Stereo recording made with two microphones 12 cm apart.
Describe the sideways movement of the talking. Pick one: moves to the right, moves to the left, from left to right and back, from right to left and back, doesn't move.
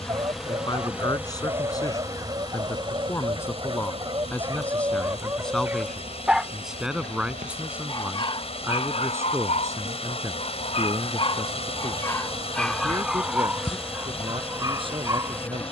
moves to the right.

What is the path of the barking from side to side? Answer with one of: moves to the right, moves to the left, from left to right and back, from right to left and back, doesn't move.
from right to left and back.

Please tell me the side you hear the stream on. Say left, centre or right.
left.